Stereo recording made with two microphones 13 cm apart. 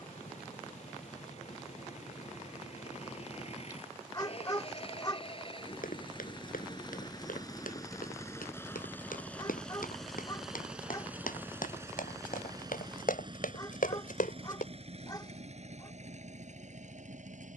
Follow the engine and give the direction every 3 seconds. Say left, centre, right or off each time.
left, left, left, centre, right, right.